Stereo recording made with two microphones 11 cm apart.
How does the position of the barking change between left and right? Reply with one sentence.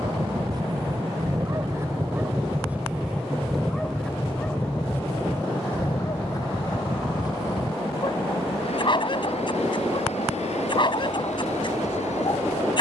In this clip you hear the barking go from the right side to the left.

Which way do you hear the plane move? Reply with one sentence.
You can hear the plane move from right to left.